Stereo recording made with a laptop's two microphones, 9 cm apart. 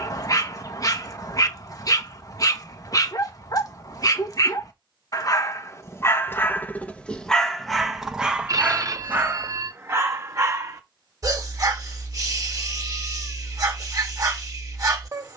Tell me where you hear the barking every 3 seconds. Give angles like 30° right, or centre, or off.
40° left, 40° left, centre, 30° right, 40° right.